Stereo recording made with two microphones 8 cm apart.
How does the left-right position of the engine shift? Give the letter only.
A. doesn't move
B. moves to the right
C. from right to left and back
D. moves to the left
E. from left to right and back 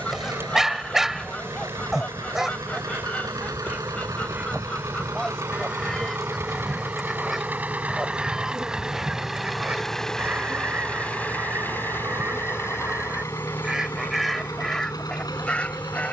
D.